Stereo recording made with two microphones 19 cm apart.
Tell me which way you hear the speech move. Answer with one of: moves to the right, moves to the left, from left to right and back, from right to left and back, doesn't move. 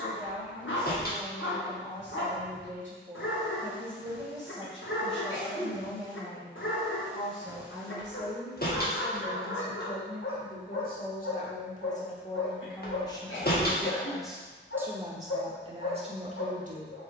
moves to the right.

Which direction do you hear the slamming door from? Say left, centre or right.
left.